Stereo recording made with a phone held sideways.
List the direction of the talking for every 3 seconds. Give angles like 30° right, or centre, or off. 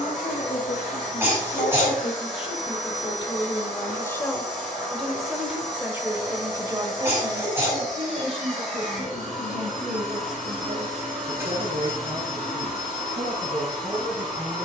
50° left, 10° left, 30° right, 60° right, 70° right.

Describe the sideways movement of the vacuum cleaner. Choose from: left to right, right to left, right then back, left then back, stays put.
stays put.